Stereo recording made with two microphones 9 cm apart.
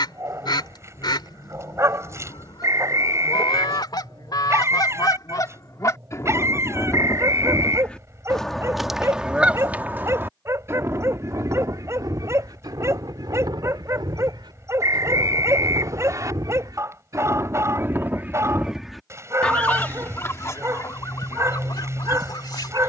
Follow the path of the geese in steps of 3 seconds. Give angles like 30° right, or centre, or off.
60° left, 50° left, 20° left, 30° right, 60° right, 50° right, 10° left, 50° left.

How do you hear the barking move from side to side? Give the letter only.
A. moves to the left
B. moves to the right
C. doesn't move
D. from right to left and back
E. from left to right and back
C.